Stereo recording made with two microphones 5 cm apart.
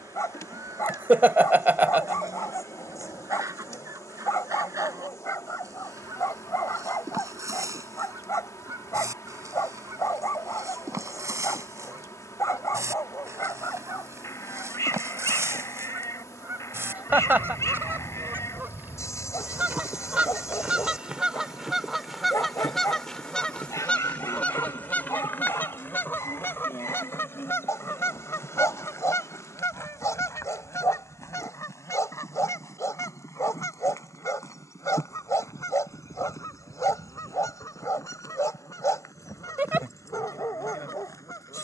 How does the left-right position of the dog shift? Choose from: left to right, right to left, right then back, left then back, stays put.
stays put.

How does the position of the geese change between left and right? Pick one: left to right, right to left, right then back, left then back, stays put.
right to left.